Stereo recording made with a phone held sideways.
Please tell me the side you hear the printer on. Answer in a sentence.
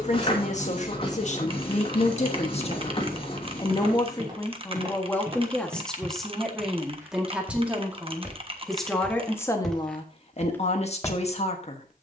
In this clip you hear the printer on the left.